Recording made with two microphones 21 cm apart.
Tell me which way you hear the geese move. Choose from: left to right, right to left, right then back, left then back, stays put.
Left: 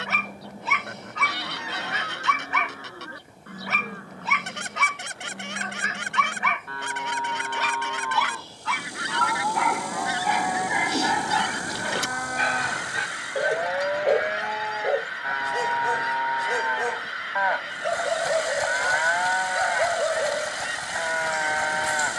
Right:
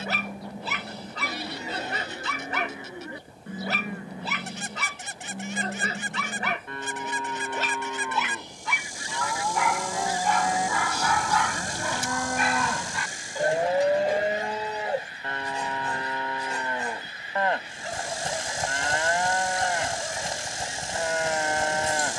stays put.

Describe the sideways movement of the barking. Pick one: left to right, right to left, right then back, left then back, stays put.
right to left.